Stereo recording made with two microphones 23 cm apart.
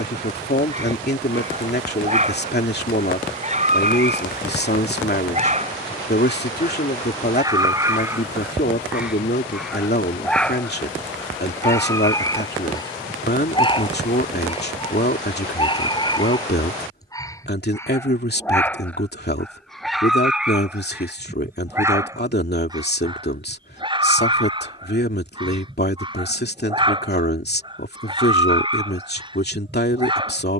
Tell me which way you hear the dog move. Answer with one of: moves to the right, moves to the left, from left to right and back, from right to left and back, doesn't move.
from right to left and back.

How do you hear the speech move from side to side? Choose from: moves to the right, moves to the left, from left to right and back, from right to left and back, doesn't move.
doesn't move.